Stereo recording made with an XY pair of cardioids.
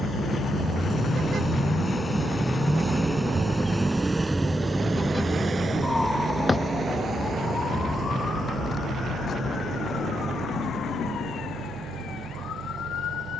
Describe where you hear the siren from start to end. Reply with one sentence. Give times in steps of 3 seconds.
In this clip you hear the siren on the right from 0 s, in the centre from 3 s and on the left from 6 s.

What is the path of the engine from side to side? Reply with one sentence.
You can hear the engine go from the left side to the right.